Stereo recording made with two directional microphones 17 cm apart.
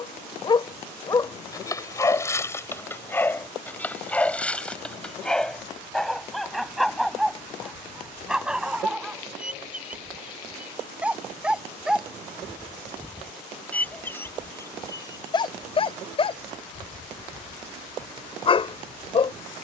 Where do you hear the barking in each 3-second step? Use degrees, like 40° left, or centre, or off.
20° left, 10° left, centre, 10° right, 10° left, 30° left, 30° left.